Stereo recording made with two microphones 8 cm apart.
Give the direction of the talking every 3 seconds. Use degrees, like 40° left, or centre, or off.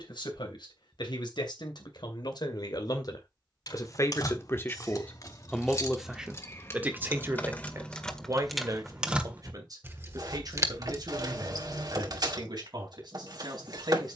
70° left, 30° left, 30° right, 50° right, 60° right.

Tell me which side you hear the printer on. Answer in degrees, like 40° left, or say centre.
60° right.